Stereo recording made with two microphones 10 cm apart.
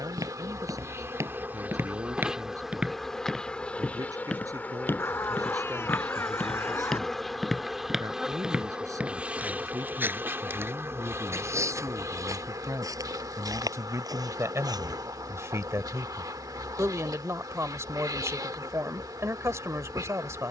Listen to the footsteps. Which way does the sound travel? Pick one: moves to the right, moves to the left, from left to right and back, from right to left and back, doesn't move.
from right to left and back.